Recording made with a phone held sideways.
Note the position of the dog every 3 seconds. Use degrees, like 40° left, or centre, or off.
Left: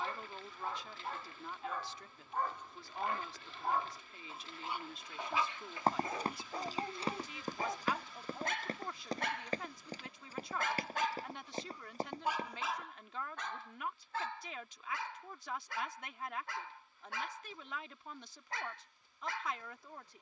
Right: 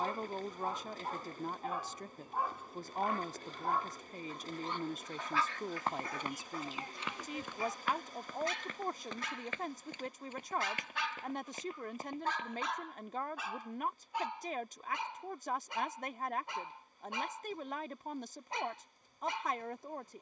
10° right, 10° left, 40° left, 50° left, centre, 20° right, 20° right.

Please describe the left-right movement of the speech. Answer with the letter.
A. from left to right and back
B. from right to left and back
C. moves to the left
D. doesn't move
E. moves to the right
D.